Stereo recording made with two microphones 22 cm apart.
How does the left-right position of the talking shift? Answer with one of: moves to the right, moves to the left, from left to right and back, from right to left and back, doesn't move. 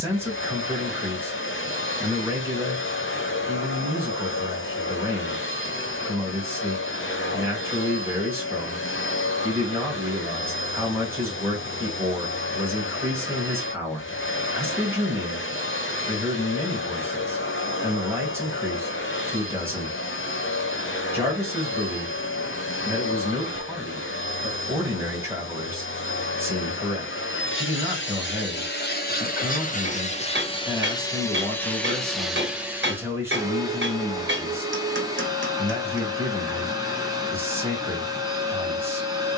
doesn't move.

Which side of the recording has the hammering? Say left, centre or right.
right.